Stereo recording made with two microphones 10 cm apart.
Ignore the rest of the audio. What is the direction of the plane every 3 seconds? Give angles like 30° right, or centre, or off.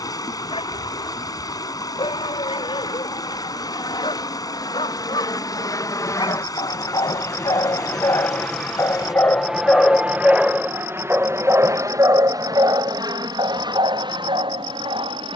60° left, 50° left, 20° left, 20° right, 40° right.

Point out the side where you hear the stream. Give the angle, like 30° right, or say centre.
40° left.